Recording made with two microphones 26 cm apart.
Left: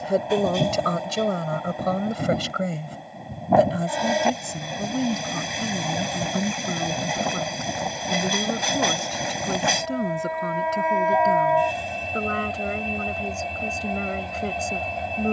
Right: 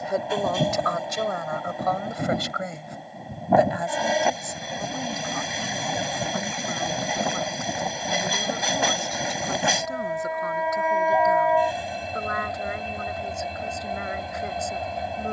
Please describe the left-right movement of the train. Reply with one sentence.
You can hear the train stay in one place.